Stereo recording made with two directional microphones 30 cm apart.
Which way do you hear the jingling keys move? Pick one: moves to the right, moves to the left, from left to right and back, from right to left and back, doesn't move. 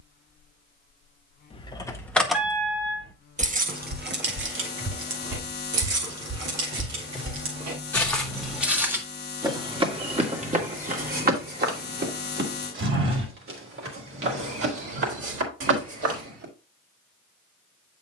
moves to the right.